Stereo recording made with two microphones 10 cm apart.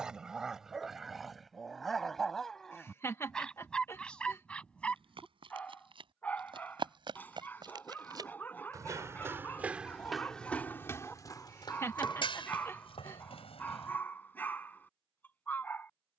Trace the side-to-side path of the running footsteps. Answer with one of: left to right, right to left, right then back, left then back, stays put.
right to left.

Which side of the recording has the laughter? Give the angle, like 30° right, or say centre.
30° left.